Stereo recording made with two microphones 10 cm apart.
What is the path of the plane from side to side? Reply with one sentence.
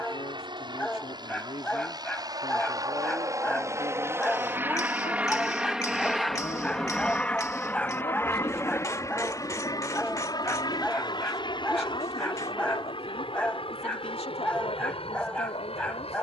In this clip you hear the plane travel towards the left.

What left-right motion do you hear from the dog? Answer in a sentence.
In this clip you hear the dog stay in one place.